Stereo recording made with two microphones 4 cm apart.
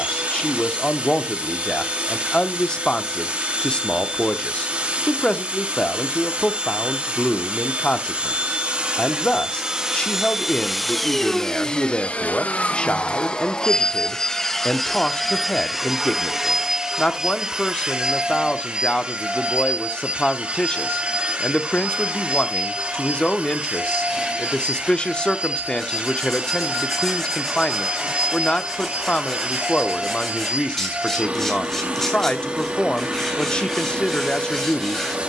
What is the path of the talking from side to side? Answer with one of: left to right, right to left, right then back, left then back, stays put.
stays put.